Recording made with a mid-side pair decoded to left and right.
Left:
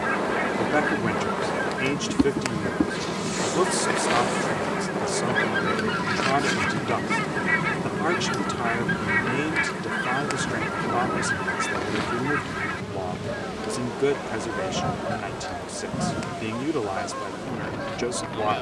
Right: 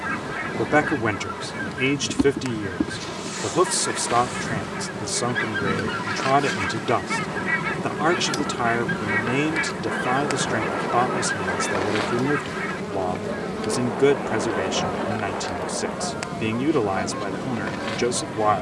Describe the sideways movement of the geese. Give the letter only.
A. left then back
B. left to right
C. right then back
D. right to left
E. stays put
E.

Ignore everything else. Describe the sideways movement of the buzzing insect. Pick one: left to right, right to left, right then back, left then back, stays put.
left to right.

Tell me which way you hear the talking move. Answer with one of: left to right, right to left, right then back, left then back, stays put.
stays put.